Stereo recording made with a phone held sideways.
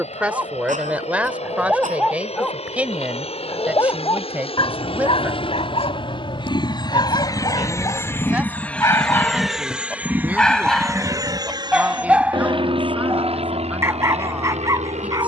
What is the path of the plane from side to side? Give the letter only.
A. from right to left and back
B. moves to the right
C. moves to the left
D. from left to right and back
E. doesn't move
B.